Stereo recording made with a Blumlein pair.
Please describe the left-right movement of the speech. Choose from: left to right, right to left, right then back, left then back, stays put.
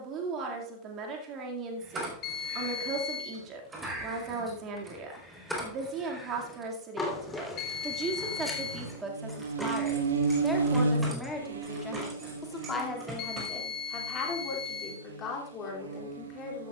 right to left.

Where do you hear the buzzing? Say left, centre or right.
right.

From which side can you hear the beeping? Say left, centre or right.
left.